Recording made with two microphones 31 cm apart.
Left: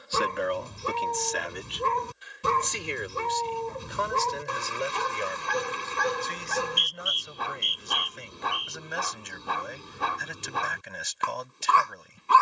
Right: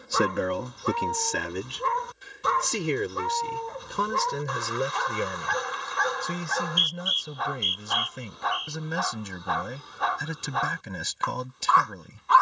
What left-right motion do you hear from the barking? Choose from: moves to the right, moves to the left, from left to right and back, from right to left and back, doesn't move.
doesn't move.